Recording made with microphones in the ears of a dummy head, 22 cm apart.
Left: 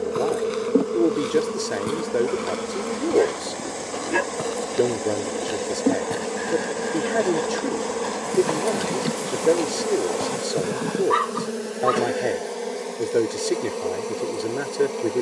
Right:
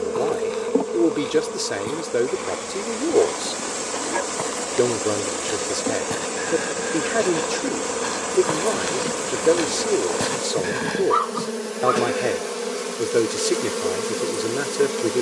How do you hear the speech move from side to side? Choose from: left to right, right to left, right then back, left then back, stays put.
stays put.